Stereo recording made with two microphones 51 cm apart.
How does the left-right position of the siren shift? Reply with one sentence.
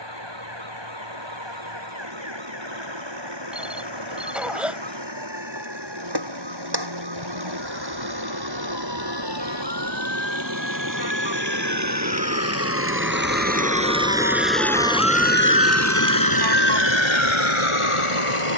You can hear the siren travel towards the left.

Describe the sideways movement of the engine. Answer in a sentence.
In this clip you hear the engine move to the left.